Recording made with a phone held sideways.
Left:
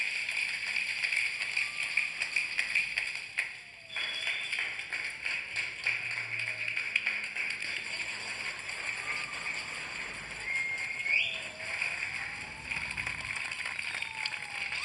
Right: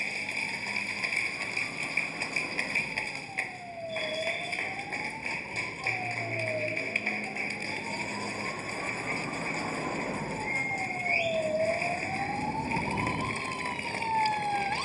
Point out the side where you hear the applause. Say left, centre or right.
right.